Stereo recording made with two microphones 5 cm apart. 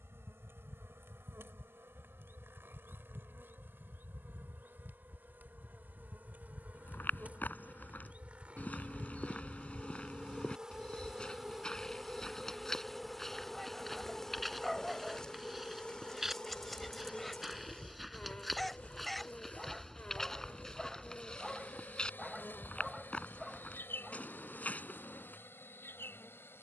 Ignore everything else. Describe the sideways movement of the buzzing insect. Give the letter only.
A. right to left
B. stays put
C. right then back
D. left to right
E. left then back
A.